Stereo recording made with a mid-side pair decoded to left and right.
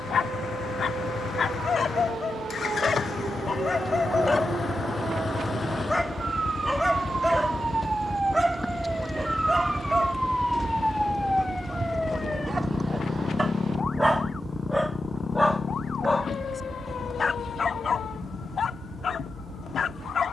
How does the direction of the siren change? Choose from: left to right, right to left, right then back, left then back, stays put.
right to left.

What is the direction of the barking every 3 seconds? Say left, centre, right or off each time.
left, left, centre, right, right, left, left.